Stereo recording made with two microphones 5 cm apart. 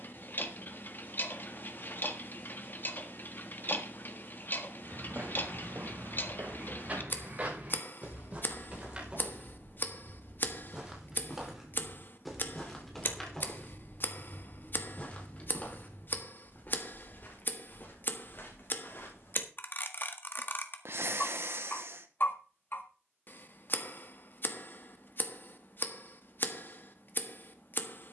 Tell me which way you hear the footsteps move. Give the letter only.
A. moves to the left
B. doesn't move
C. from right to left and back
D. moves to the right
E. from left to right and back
A.